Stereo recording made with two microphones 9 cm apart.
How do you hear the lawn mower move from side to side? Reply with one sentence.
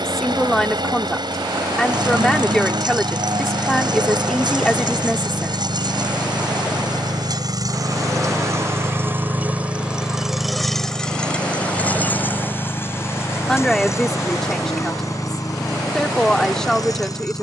You can hear the lawn mower move from right to left.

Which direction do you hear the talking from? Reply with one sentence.
You can hear the talking in the centre.